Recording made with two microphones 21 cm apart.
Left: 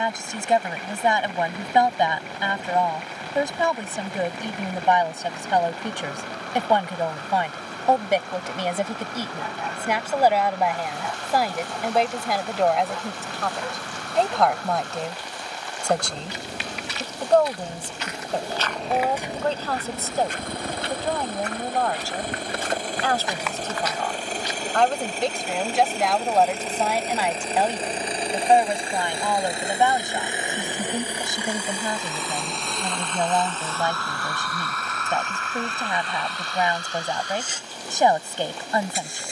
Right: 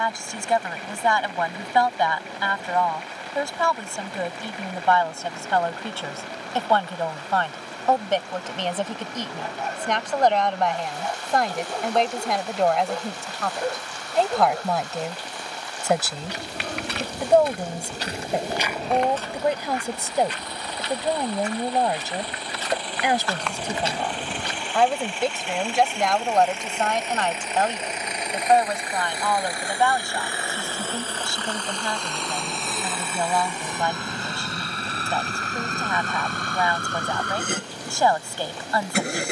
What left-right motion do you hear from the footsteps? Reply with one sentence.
You can hear the footsteps move from right to left and back again.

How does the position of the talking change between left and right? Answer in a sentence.
You can hear the talking go right and come back.